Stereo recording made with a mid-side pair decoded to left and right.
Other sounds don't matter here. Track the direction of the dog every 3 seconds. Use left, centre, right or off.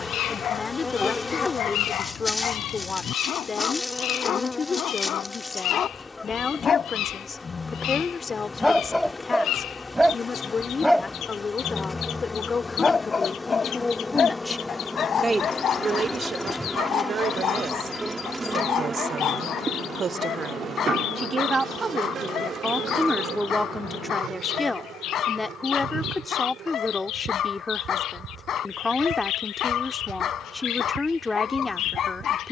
left, left, left, centre, left, left, left, left, left, left, left.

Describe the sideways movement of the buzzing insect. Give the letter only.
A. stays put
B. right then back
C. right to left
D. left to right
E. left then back
D.